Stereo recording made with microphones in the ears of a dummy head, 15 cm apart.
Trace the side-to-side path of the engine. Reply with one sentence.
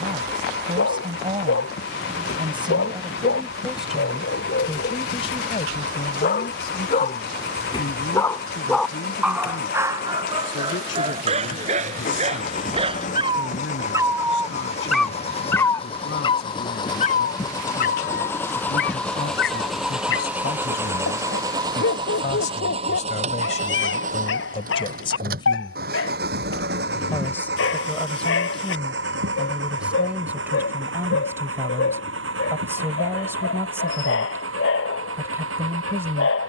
In this clip you hear the engine go from the left side to the right.